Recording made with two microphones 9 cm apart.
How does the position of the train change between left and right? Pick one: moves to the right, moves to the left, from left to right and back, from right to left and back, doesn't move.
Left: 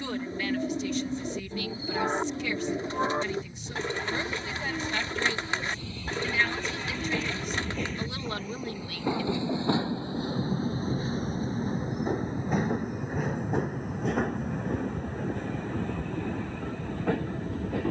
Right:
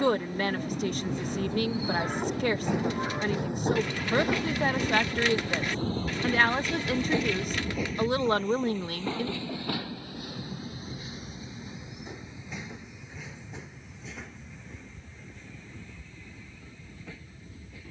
moves to the left.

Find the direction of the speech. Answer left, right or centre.
right.